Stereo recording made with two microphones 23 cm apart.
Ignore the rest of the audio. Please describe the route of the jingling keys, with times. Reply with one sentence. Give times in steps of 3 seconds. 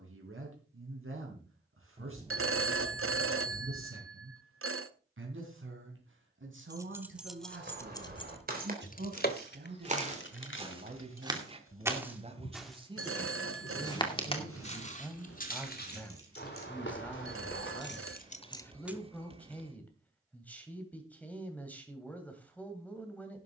You can hear the jingling keys not at all from 0 s, in the centre from 6 s, on the left from 9 s and not at all from 21 s.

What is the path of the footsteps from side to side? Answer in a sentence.
You can hear the footsteps go from the right side to the left.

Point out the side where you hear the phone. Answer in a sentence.
You can hear the phone on the right.